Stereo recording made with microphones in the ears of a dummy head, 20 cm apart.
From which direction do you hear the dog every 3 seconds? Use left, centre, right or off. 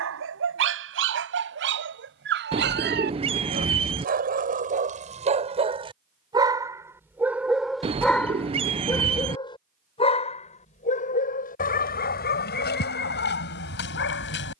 right, right, centre, left, left.